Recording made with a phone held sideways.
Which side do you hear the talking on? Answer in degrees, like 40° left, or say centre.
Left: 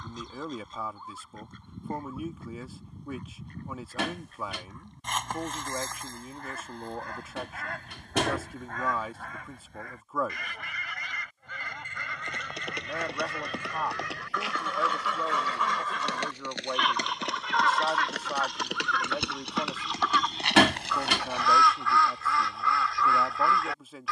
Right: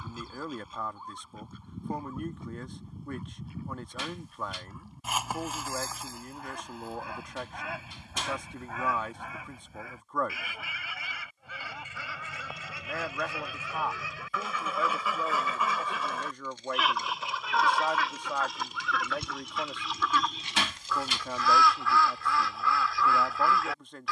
10° left.